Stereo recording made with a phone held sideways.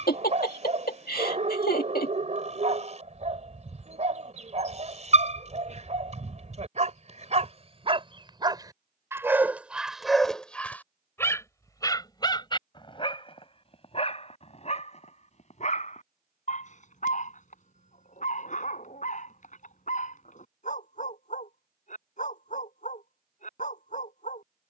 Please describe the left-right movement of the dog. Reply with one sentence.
You can hear the dog go from the right side to the left.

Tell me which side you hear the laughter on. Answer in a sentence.
You can hear the laughter on the left.